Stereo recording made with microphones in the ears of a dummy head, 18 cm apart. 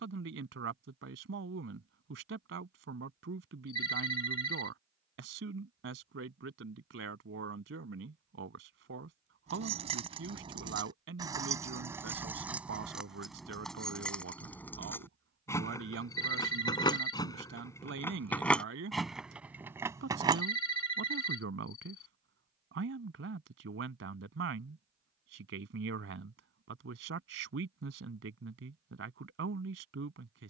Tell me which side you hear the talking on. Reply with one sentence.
You can hear the talking on the right.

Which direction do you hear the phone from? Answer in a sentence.
In this clip you hear the phone on the left.